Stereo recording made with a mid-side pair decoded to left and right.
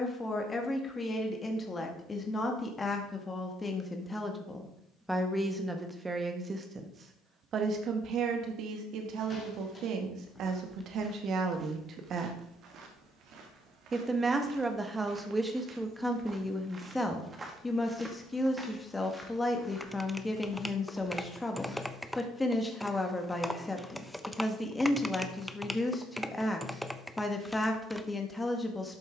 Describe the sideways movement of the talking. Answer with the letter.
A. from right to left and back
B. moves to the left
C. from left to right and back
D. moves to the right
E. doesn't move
C.